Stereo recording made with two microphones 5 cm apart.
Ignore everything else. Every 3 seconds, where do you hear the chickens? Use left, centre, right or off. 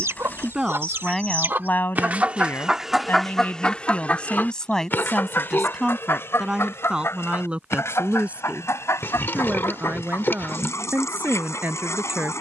right, left, left, left.